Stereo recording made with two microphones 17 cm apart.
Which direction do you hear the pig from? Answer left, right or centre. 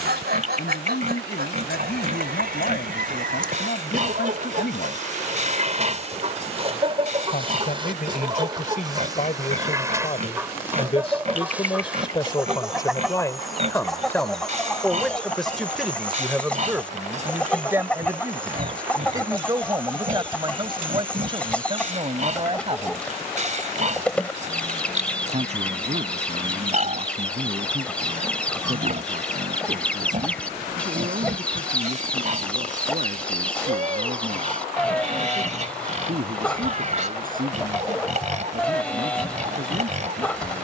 right.